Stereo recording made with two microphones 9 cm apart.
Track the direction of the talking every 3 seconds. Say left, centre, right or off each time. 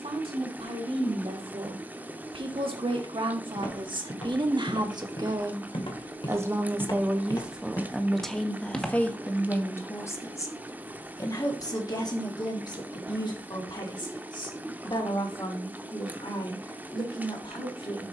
right, right, centre, left, left, left.